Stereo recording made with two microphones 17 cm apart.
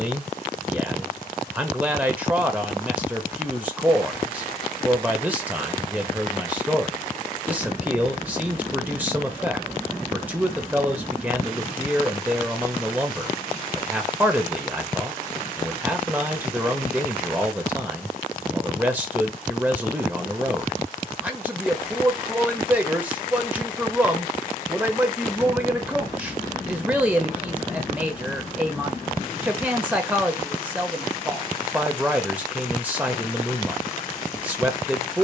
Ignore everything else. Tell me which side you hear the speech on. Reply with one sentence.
You can hear the speech in the centre.